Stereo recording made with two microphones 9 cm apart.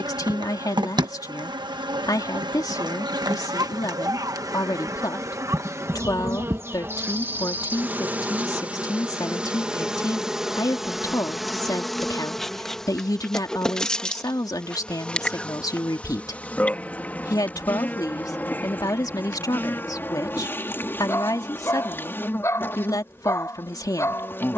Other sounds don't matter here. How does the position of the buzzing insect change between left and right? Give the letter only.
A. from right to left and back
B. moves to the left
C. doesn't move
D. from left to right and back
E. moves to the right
B.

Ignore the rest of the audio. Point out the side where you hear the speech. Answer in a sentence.
You can hear the speech on the left.